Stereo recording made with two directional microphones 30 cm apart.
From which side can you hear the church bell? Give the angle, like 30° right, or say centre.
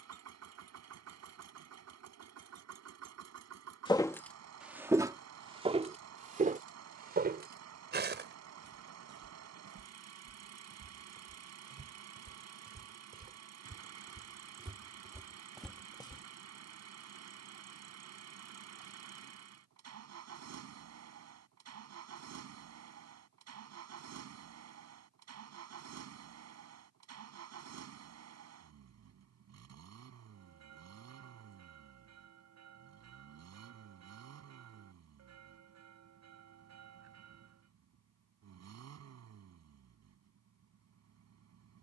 60° right.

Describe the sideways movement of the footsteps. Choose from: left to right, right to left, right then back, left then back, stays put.
right then back.